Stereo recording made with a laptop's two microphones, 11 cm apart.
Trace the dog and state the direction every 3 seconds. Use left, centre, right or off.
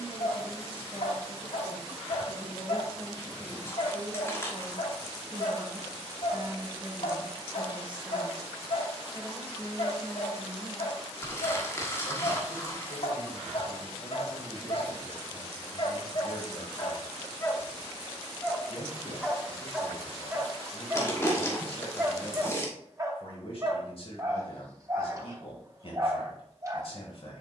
left, left, left, left, left, left, centre, right, right.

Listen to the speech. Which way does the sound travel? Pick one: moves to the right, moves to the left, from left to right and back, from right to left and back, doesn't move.
from left to right and back.